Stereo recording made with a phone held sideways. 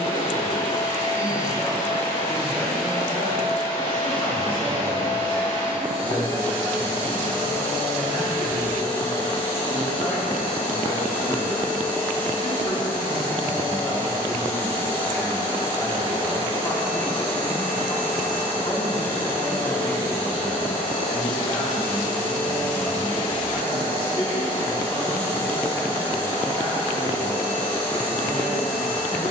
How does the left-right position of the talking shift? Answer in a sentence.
In this clip you hear the talking stay in one place.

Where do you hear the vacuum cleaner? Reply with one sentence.
You can hear the vacuum cleaner on the left.